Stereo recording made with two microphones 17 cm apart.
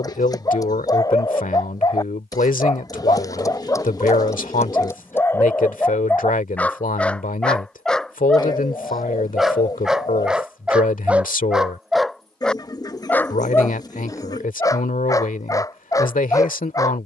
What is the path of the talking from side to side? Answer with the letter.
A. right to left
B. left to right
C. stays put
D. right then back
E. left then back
C.